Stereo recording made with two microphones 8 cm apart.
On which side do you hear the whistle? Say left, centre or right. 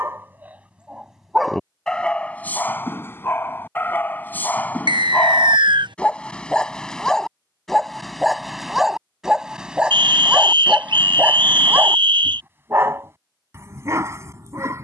right.